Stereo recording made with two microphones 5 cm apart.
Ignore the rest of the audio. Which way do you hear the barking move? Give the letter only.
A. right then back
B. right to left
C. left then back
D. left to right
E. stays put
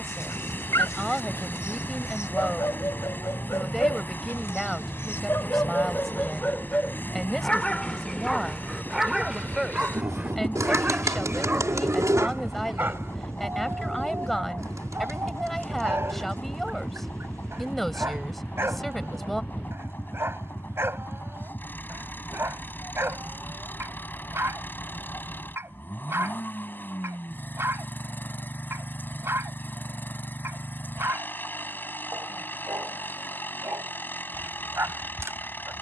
D.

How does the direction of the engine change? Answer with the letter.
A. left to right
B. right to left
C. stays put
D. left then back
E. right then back
C.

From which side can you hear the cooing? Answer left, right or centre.
right.